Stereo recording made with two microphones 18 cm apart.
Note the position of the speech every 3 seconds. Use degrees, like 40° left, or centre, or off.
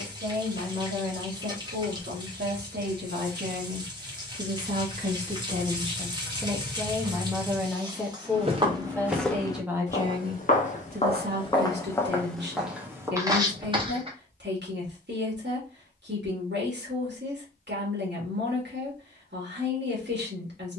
70° right, 50° right, 10° right, 40° right, 80° right, 80° right, 80° right.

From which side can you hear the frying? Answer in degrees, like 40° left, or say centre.
20° right.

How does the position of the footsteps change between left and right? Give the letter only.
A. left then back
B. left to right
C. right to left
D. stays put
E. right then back
A.